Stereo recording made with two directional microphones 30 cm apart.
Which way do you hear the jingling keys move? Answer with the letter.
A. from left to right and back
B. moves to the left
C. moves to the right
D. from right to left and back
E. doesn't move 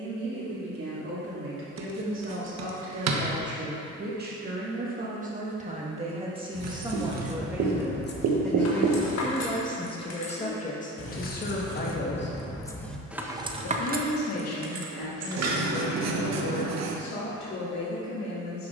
D.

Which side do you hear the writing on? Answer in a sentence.
You can hear the writing on the right.